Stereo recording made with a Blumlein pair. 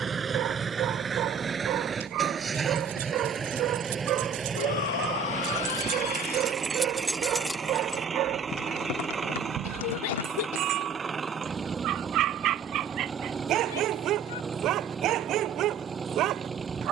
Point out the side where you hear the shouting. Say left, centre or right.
left.